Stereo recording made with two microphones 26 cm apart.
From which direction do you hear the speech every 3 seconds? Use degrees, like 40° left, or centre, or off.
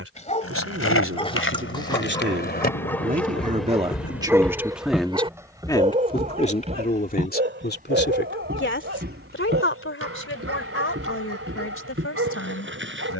50° right, 10° right, 40° left, 60° left, 70° left.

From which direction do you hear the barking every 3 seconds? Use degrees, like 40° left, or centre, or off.
20° left, 10° right, 50° right, 60° right, 60° right.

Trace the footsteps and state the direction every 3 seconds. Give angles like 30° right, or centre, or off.
60° left, centre, 30° right, 50° right, 50° right.